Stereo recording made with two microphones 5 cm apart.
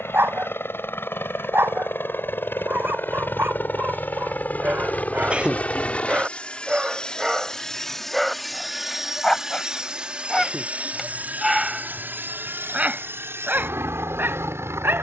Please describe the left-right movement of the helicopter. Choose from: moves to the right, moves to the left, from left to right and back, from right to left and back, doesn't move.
moves to the right.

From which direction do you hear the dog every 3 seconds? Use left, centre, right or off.
right, right, centre, centre, right.